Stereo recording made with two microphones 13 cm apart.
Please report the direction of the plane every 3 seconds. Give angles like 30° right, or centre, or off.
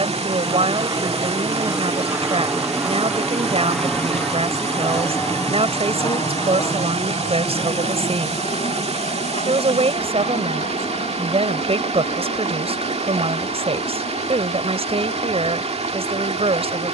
20° right, 10° left, 40° left, 50° left, 60° left, 70° left.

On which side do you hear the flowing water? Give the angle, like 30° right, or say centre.
50° right.